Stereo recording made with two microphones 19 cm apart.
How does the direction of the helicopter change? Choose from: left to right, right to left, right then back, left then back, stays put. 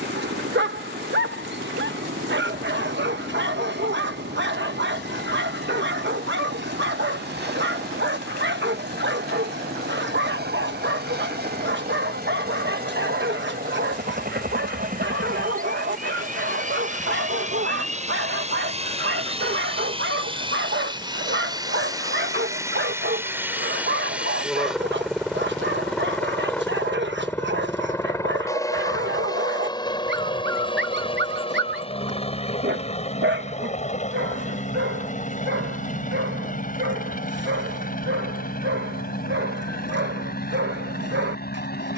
right to left.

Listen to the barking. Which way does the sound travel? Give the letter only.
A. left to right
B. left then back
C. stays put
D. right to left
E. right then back
C.